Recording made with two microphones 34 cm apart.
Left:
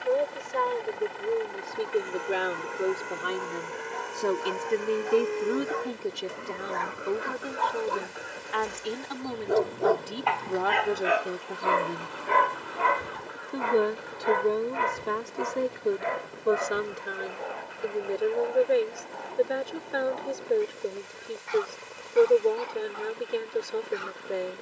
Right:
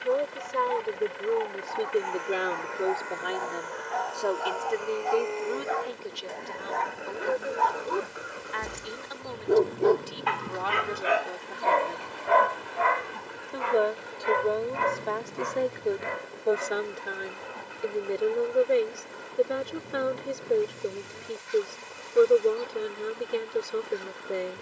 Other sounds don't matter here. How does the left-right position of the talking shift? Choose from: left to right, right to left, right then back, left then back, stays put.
left then back.